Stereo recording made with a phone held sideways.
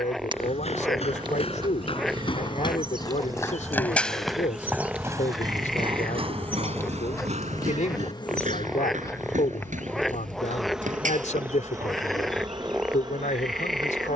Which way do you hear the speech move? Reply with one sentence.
You can hear the speech stay in one place.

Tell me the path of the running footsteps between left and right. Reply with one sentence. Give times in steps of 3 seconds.
You can hear the running footsteps on the left from 0 s, in the centre from 3 s and on the right from 6 s.